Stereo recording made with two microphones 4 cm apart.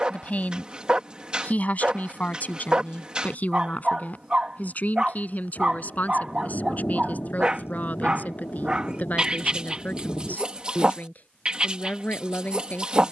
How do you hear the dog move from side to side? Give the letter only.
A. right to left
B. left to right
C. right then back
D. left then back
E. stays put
E.